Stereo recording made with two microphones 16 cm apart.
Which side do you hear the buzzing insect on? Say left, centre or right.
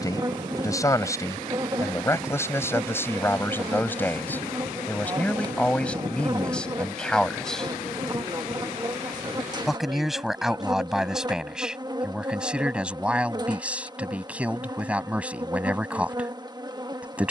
right.